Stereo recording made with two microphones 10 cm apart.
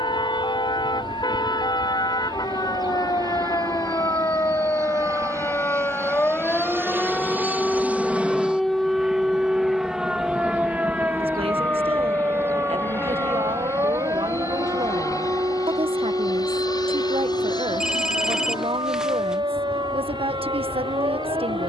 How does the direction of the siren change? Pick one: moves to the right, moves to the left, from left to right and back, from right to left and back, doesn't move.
moves to the right.